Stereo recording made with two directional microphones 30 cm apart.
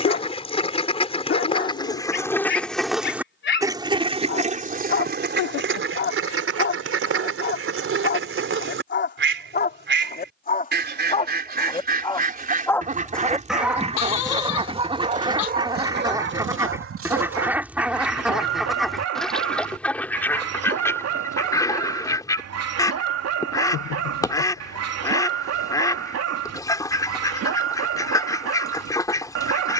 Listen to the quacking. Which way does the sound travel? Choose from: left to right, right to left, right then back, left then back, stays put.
right then back.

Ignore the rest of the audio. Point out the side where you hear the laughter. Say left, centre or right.
left.